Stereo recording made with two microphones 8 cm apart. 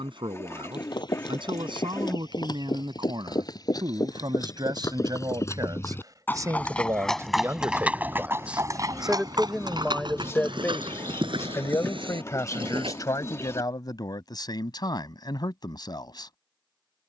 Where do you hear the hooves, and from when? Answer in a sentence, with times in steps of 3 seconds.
In this clip you hear the hooves on the left from 0 s, in the centre from 6 s, on the right from 9 s and not at all from 15 s.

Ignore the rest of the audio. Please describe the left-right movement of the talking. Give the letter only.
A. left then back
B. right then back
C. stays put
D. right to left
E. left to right
D.